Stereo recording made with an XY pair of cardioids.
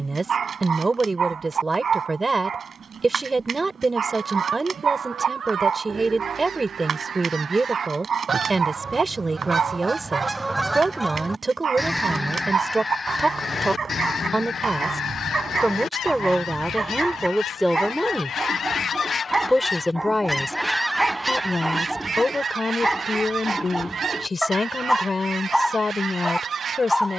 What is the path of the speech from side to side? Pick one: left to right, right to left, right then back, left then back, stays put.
right to left.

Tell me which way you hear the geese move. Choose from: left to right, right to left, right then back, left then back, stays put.
left then back.